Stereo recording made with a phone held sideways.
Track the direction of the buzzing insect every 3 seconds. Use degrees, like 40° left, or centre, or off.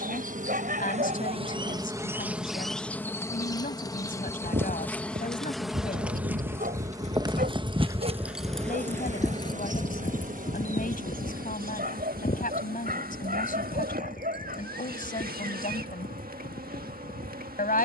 30° right, 10° left, 30° right, 60° right, 70° right, 70° right.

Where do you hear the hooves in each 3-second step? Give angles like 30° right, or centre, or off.
off, 80° right, 30° right, 40° left, 60° left, 70° left.